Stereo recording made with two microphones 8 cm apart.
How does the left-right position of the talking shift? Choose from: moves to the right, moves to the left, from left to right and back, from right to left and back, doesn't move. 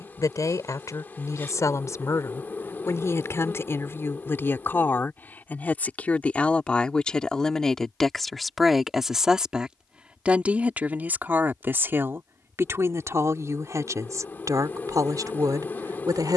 moves to the right.